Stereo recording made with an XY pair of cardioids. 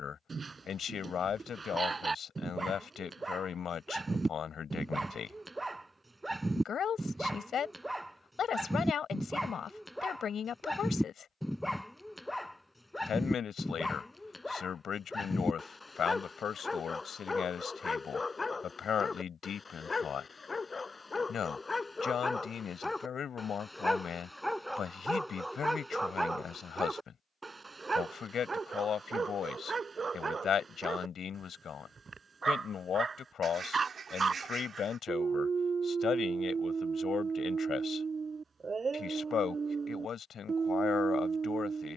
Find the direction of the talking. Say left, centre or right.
left.